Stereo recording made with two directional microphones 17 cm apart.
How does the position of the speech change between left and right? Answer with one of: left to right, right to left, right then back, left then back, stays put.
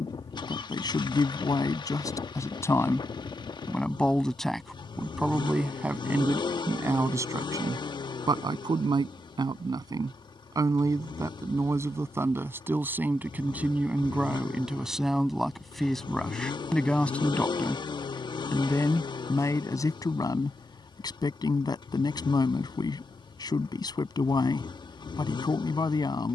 right then back.